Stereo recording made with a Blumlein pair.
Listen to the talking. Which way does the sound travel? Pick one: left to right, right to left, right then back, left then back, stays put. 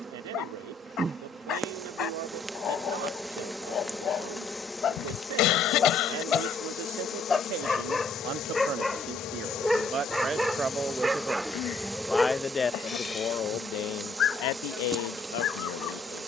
right to left.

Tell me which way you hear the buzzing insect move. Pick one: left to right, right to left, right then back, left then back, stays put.
left then back.